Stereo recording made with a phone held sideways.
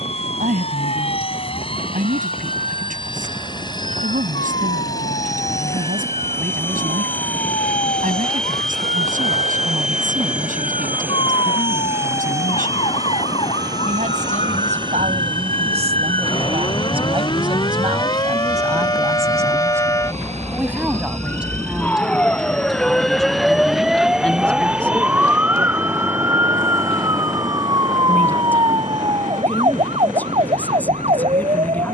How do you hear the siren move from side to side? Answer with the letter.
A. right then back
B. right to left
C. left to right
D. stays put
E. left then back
C.